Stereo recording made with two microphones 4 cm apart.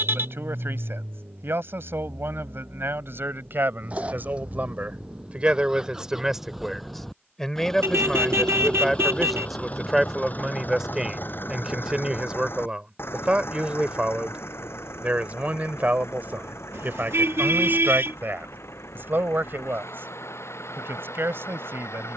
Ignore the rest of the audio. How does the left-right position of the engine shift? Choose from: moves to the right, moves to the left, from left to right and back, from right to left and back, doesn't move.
moves to the left.